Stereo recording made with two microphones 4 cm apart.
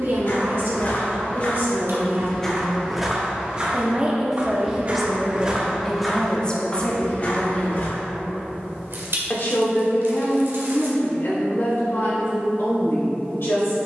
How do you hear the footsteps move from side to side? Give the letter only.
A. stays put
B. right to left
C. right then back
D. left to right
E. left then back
C.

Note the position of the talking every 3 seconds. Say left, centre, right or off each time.
right, centre, left, left, left.